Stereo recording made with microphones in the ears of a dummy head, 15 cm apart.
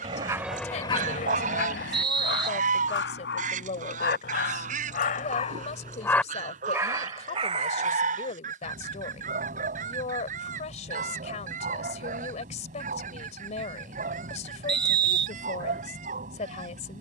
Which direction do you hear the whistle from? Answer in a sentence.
In this clip you hear the whistle on the right.